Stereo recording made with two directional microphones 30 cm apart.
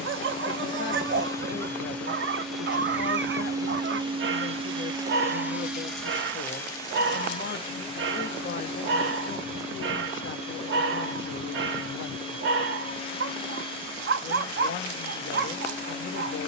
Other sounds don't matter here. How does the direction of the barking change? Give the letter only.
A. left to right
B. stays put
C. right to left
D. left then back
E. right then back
B.